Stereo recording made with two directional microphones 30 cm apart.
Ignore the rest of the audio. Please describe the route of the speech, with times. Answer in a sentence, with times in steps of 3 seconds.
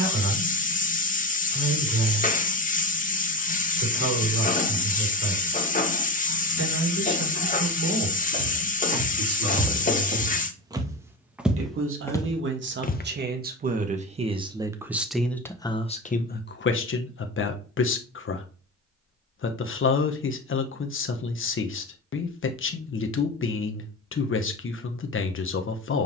You can hear the speech on the right from 0 s and on the left from 15 s.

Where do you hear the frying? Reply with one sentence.
In this clip you hear the frying on the left.